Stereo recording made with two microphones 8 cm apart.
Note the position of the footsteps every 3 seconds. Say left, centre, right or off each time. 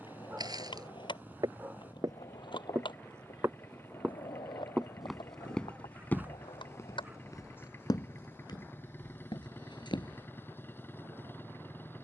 right, centre, left, left.